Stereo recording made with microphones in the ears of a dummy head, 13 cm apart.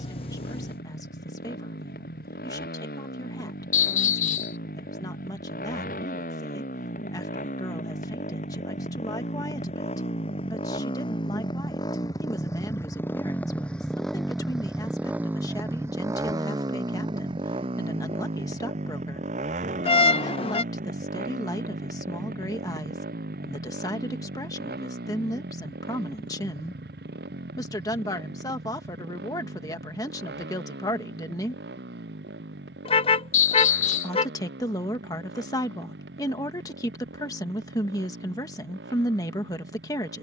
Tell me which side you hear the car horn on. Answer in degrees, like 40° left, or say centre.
40° left.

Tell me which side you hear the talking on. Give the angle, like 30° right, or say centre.
20° left.